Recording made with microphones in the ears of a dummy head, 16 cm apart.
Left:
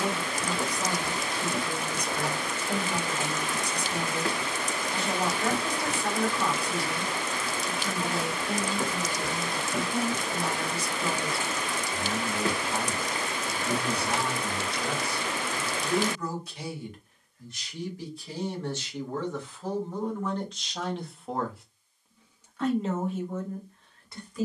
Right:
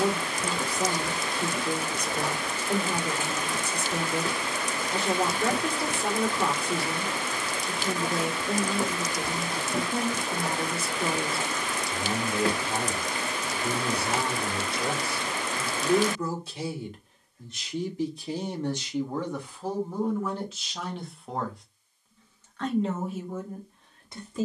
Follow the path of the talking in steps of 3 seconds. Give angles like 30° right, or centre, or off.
20° right, 20° right, 20° right, 20° right, 20° right, 20° right, 10° right, centre.